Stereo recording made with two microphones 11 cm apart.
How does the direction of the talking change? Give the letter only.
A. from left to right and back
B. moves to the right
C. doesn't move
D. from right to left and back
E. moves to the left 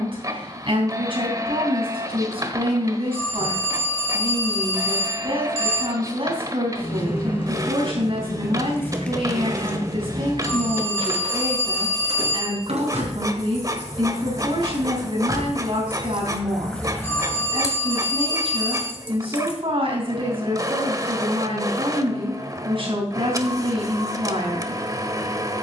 C.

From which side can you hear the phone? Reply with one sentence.
You can hear the phone on the left.